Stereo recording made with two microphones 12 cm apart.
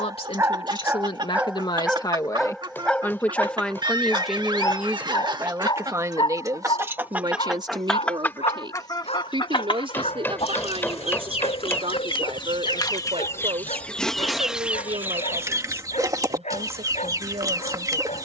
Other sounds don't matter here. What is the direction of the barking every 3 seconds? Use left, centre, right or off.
centre, left, left, left, left, left.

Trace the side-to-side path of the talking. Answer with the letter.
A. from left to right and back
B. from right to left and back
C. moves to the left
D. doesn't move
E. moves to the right
E.